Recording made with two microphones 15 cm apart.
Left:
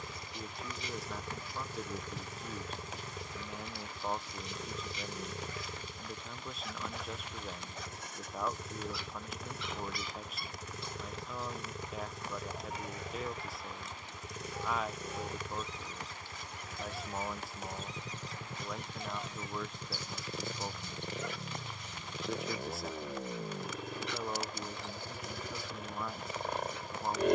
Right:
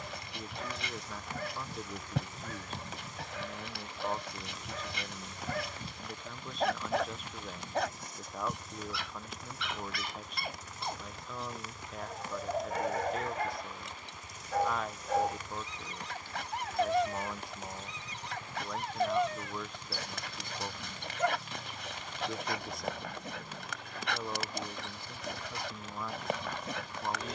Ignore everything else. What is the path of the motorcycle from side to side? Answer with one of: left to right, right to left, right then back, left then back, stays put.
stays put.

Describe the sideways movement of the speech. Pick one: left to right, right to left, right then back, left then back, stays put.
stays put.